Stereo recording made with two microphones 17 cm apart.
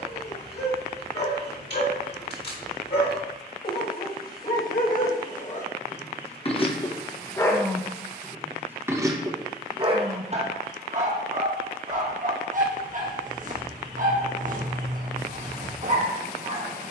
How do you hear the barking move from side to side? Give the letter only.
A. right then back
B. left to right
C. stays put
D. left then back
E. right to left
B.